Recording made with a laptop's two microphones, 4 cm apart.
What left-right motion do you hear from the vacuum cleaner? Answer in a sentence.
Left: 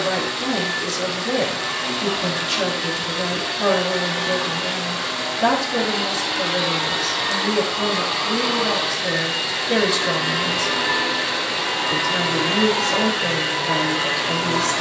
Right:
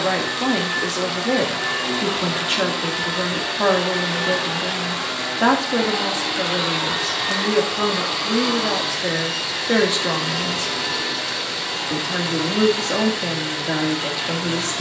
You can hear the vacuum cleaner travel towards the left.